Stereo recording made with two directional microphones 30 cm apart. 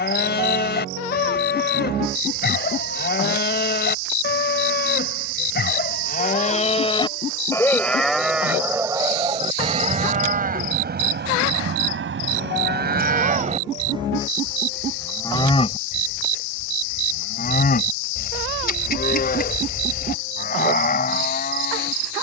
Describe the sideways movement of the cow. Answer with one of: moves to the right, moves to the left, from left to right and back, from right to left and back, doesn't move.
from left to right and back.